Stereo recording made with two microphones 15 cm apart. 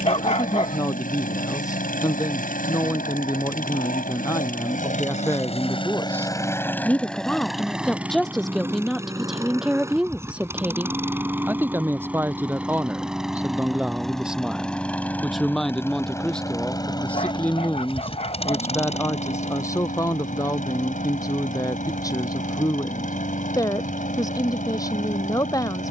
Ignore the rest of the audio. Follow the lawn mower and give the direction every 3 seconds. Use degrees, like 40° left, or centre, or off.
60° left, 60° left, centre, 20° right, centre, 20° left, 50° left, 60° left, 60° left.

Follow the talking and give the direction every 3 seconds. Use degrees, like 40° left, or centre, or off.
20° left, 20° left, centre, 10° right, 10° right, 10° left, 20° left, 20° left, 20° left.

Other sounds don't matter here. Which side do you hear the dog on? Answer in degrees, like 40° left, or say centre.
40° left.